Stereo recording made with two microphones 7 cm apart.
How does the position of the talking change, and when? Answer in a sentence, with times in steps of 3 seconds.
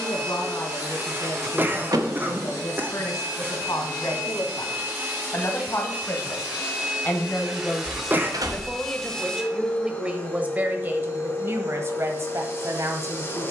In this clip you hear the talking on the left from 0 s and on the right from 9 s.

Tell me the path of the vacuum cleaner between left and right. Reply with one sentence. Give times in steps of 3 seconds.
You can hear the vacuum cleaner on the right from 0 s, in the centre from 6 s and on the left from 9 s.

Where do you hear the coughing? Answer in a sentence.
You can hear the coughing on the right.